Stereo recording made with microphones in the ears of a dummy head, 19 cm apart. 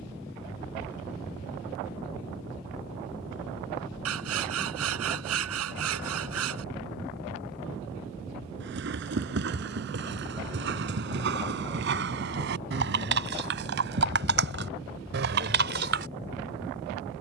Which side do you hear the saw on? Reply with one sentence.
In this clip you hear the saw on the right.